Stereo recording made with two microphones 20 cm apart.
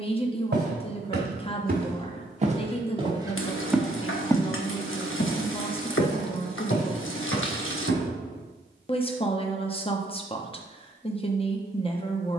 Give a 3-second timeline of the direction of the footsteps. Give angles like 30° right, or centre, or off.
40° right, 20° left, 70° left, off.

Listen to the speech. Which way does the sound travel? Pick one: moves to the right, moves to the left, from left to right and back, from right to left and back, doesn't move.
doesn't move.